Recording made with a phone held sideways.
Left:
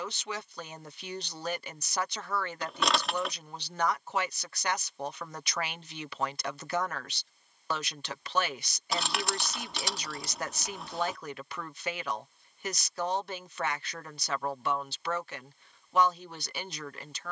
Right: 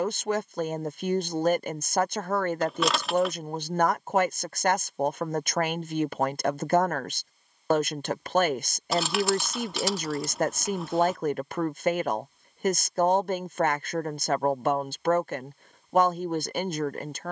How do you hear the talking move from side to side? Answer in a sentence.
You can hear the talking stay in one place.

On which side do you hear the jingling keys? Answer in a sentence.
You can hear the jingling keys in the centre.